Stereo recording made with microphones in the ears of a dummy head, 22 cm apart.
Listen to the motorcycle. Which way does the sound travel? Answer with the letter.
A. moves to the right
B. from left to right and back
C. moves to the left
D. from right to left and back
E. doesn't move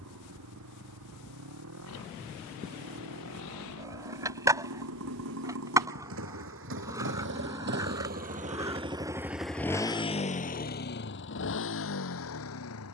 C.